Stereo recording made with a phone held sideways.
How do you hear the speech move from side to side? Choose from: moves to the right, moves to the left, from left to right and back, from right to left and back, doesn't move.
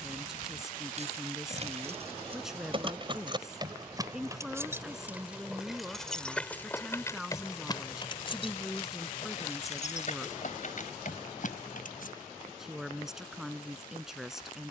doesn't move.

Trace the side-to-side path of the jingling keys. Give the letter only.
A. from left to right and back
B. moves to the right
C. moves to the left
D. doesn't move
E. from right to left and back
C.